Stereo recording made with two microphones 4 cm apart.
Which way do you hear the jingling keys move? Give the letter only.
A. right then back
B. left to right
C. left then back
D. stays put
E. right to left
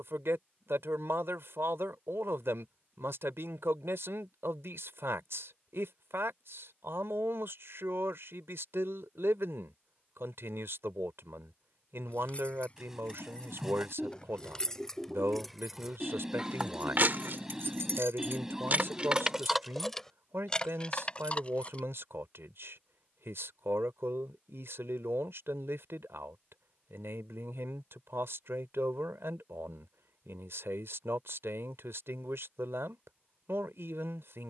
A.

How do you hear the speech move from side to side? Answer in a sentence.
In this clip you hear the speech stay put.